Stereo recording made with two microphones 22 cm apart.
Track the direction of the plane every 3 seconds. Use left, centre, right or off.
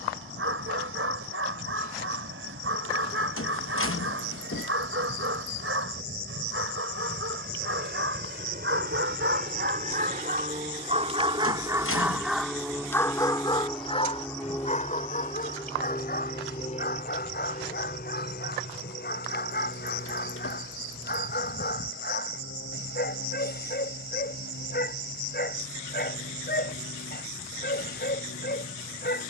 right, right, right, right, centre, left, left, left, left, left.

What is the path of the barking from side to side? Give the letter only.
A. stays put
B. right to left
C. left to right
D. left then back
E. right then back
B.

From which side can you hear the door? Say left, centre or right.
left.